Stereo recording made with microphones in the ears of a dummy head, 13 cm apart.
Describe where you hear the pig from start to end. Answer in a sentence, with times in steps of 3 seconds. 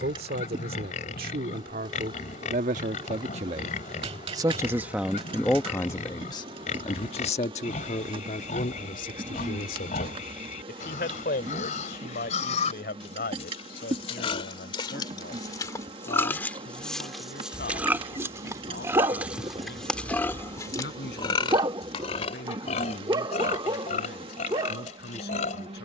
You can hear the pig on the left from 0 s, in the centre from 15 s and on the left from 21 s.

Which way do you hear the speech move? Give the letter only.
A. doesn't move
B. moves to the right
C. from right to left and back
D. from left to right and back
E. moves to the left
E.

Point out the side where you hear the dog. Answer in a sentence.
You can hear the dog on the right.